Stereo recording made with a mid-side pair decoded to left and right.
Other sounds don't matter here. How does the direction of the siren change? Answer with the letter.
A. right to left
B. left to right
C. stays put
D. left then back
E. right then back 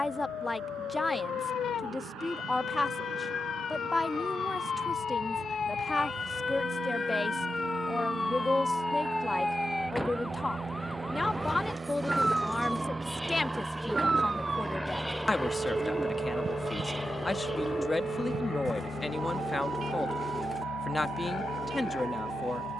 B.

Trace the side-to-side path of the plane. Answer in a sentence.
You can hear the plane move to the left.